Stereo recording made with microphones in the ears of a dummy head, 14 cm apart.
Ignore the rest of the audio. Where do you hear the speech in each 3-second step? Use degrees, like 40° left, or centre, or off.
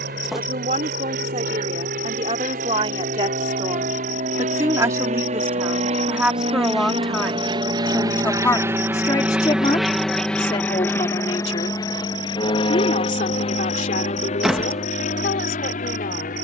40° right, 20° right, centre, 30° left, 50° left, 60° left.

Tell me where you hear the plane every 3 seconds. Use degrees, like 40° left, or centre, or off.
70° right, 60° right, 30° right, 10° left, 40° left, 50° left.